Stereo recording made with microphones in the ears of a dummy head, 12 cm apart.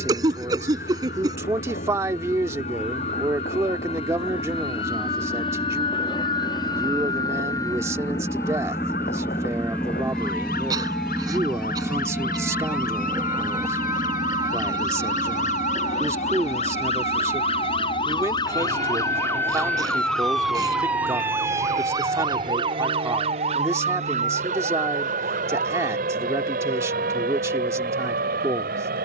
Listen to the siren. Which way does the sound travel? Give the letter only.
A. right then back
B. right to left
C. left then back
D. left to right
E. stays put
D.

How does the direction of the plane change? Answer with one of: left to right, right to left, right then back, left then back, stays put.
left to right.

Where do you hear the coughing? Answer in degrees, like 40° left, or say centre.
30° right.